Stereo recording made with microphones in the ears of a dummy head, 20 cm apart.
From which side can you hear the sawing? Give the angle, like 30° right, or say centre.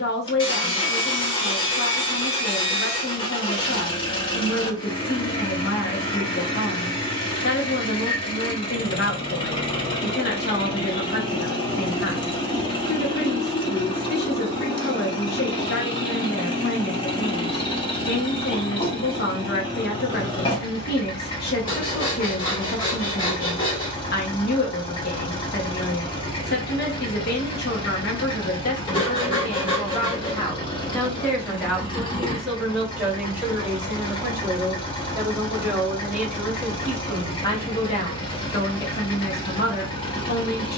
20° left.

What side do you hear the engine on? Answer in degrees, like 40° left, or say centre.
20° left.